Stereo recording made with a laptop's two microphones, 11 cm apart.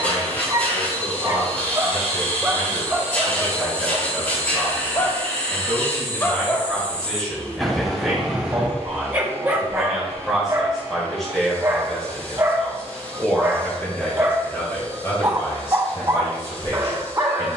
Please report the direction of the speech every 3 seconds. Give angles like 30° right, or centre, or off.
30° left, 20° left, centre, centre, 10° left, 30° left.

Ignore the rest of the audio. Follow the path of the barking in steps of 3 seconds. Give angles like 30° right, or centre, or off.
30° right, 20° left, centre, 20° right, 30° right, 30° right.